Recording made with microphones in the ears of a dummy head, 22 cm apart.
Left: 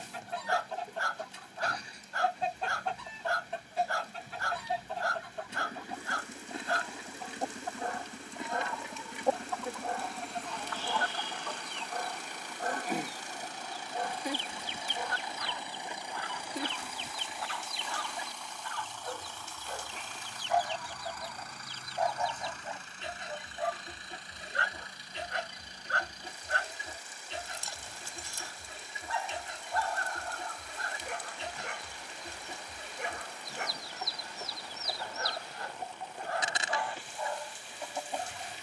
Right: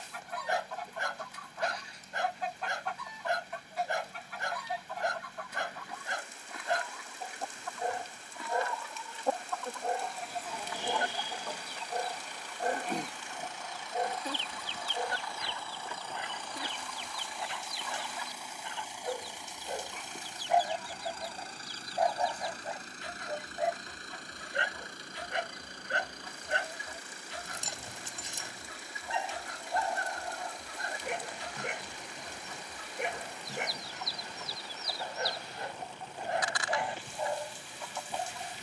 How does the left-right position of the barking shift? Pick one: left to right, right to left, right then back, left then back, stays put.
stays put.